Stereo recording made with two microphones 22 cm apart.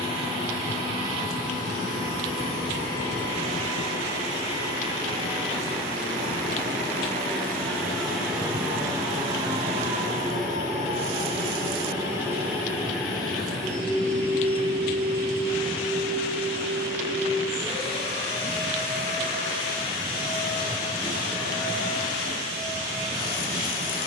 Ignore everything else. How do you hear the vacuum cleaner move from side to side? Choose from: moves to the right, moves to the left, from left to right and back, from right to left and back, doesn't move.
from left to right and back.